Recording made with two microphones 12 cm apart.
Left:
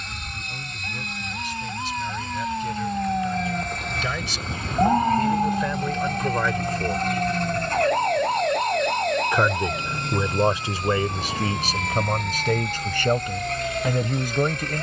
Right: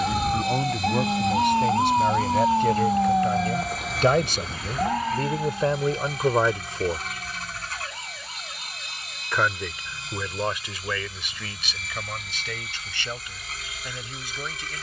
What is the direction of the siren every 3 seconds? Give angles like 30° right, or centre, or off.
50° right, 10° left, 50° left, 60° left, 70° left.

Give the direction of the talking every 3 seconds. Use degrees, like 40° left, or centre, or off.
60° right, 40° right, 20° right, 30° left, 50° left.